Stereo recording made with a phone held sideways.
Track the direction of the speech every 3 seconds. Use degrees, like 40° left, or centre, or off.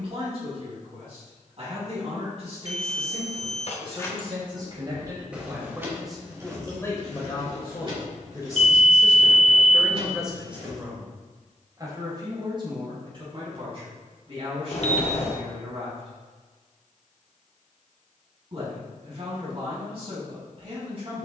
50° right, 30° right, 20° left, 10° right, 40° right, 50° right, 50° right.